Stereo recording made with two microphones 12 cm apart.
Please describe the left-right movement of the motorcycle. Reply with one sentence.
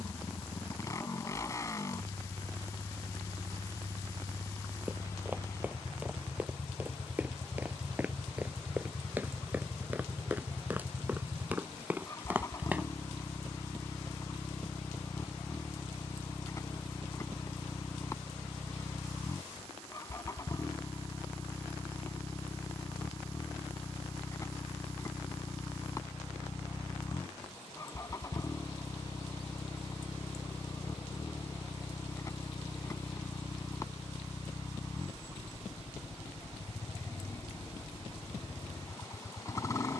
You can hear the motorcycle stay put.